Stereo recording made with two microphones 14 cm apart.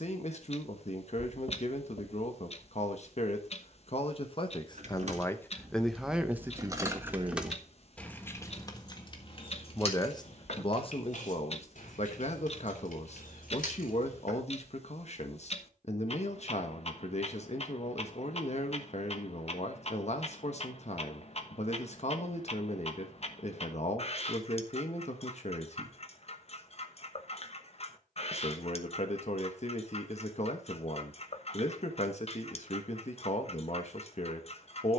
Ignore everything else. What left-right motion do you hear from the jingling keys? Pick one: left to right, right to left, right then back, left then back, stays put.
right to left.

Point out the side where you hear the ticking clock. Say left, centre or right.
left.